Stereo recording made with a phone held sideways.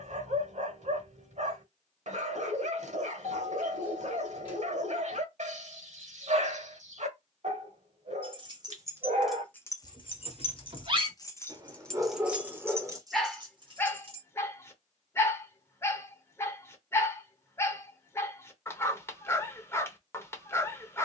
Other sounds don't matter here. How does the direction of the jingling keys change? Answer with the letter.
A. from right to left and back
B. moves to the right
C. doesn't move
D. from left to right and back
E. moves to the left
A.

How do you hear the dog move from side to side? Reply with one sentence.
In this clip you hear the dog move to the left.